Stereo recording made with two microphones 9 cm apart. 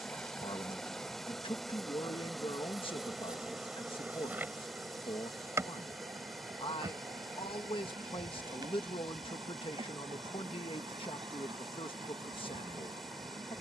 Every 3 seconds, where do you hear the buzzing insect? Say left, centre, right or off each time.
centre, right, right, right, right.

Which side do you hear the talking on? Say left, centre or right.
left.